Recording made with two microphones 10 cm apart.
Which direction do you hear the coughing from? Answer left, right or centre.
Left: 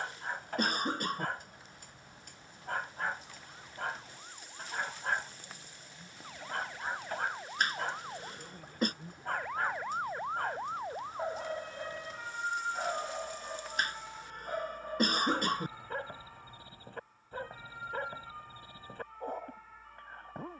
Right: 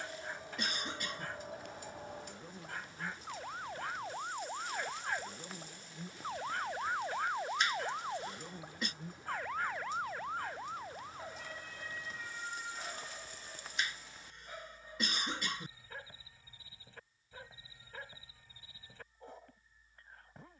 left.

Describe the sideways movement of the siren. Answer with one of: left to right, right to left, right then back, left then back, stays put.
right to left.